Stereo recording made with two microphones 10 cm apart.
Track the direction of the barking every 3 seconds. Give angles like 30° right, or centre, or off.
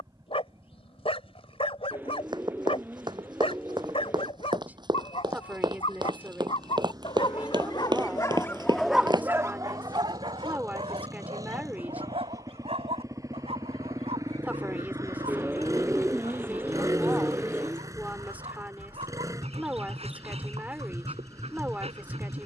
70° left, 70° left, 40° left, 50° right, 80° right, 80° right, 80° right, 80° right.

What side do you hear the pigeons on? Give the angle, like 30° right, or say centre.
20° right.